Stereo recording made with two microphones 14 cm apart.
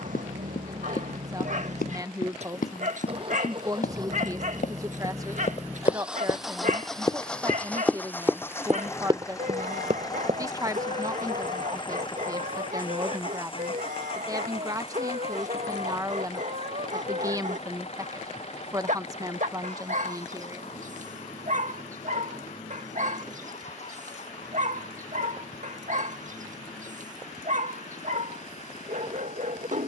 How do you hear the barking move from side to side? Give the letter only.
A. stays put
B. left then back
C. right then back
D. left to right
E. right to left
A.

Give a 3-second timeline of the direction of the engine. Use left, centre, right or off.
right, right, centre, left, left, left, left, left, left, left.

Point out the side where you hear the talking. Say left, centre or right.
right.